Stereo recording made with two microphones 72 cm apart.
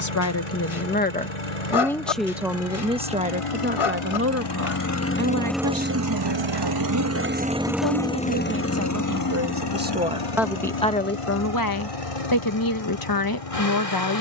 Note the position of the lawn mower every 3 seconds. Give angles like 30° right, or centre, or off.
50° left, 30° left, 10° right, 40° left, 50° left.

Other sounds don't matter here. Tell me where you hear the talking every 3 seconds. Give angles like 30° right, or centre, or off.
10° left, 20° right, 30° right, centre, 30° left.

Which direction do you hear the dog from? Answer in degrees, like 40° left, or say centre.
40° left.